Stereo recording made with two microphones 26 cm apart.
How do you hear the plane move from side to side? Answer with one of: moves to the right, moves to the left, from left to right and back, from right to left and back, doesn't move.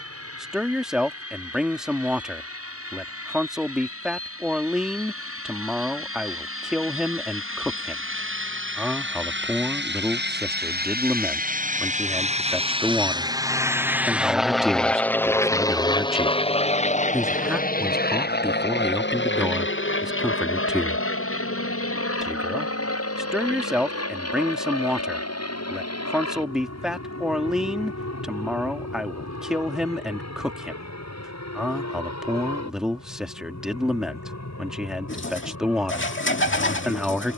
moves to the left.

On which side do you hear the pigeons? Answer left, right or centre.
left.